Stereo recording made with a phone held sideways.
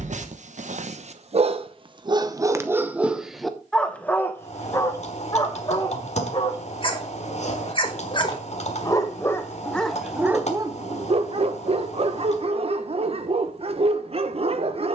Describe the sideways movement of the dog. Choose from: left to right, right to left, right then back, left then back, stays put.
left then back.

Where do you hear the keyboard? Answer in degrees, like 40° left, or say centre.
60° left.